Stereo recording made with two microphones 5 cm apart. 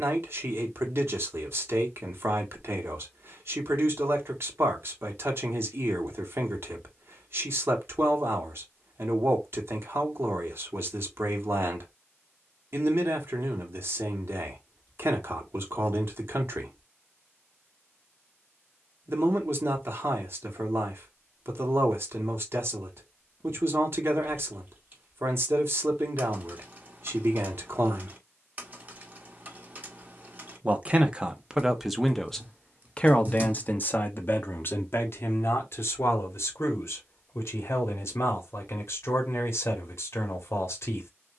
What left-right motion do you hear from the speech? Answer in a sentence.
In this clip you hear the speech move from right to left.